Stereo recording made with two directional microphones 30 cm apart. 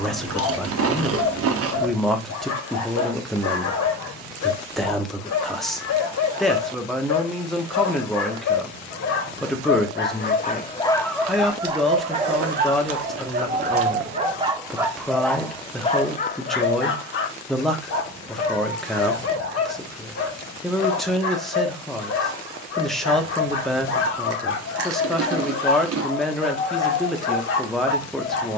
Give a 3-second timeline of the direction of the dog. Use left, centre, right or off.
left, left, left, left, right, left, left, left, left, left.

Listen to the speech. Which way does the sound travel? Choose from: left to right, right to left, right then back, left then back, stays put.
stays put.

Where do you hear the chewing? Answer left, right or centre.
right.